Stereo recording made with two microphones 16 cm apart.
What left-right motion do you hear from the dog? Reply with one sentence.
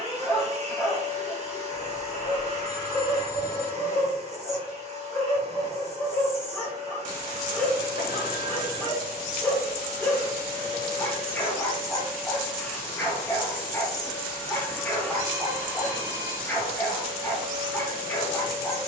In this clip you hear the dog stay put.